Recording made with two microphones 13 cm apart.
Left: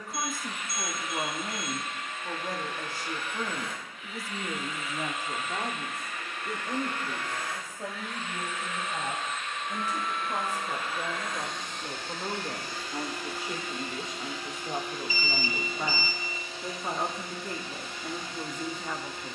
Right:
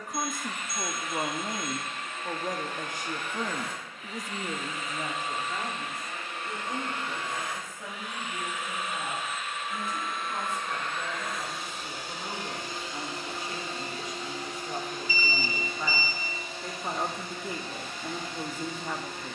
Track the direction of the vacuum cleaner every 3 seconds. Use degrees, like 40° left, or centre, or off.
50° right, 40° right, 20° right, centre, 30° right, 50° right, 60° right.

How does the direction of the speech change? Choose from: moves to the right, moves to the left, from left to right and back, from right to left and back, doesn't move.
from right to left and back.